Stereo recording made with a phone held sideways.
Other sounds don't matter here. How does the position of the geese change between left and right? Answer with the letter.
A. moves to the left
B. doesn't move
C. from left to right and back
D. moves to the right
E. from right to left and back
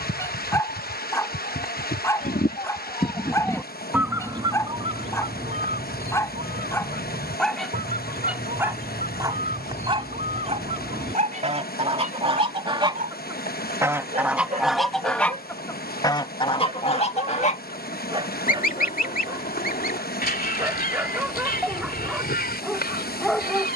C.